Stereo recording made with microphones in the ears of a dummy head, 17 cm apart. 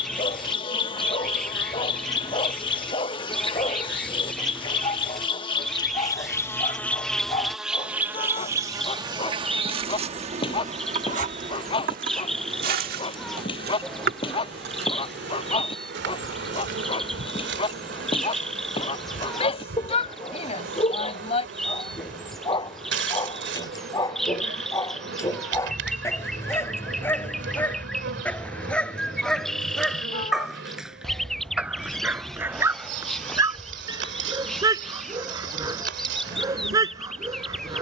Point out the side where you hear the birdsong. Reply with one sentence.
You can hear the birdsong in the centre.